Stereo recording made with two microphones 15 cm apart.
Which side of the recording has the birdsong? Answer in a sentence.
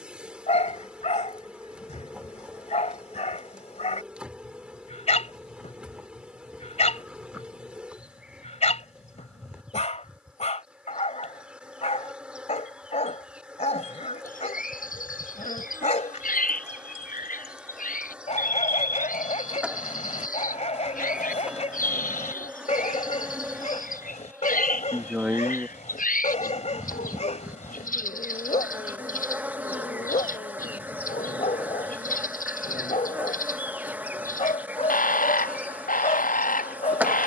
You can hear the birdsong on the left.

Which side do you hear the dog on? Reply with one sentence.
In this clip you hear the dog on the left.